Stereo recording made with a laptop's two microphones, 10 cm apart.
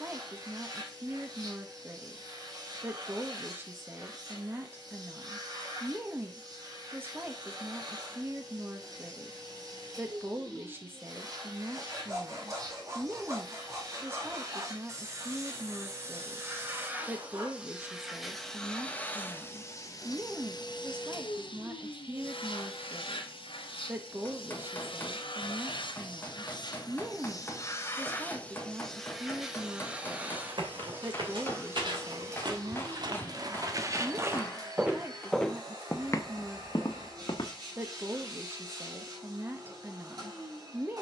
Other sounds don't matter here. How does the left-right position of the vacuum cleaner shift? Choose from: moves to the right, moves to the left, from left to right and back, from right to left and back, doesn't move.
from right to left and back.